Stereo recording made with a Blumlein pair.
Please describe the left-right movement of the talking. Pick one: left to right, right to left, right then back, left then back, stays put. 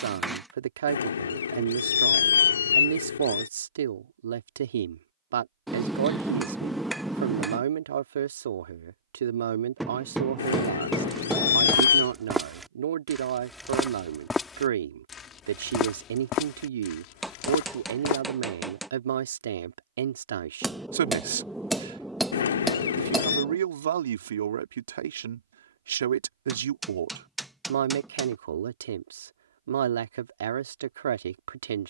stays put.